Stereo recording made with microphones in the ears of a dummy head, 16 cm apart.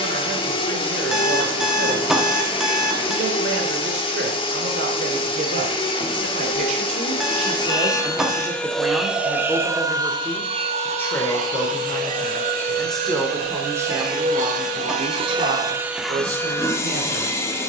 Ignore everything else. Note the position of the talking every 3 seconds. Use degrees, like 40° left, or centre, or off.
70° right, 70° right, 30° right, 10° left, 10° right, 60° right.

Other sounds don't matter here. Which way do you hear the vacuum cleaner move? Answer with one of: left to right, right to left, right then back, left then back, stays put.
right then back.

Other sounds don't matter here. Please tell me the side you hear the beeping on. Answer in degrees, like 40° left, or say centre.
centre.